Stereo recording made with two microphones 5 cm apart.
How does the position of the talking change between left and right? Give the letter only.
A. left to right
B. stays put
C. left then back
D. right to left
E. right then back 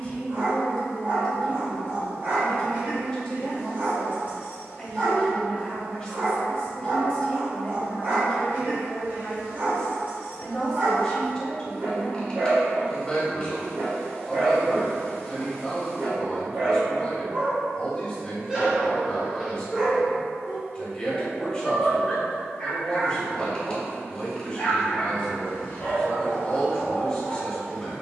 B.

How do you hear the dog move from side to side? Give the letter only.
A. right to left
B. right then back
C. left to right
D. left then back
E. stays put
A.